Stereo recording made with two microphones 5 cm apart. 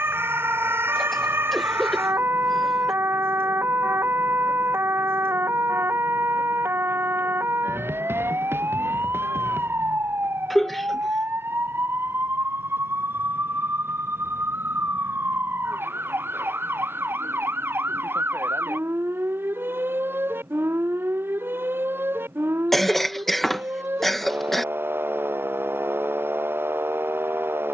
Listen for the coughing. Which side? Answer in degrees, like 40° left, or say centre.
centre.